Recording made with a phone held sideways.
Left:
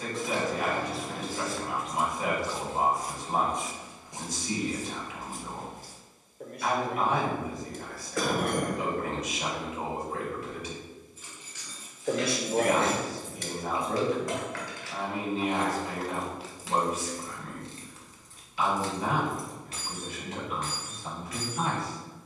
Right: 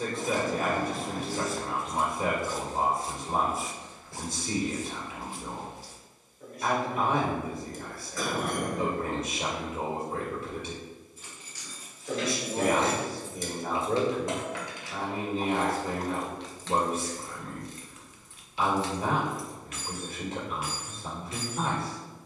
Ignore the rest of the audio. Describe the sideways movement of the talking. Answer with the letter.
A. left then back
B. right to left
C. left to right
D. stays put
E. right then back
D.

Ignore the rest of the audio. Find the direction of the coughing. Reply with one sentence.
In this clip you hear the coughing on the left.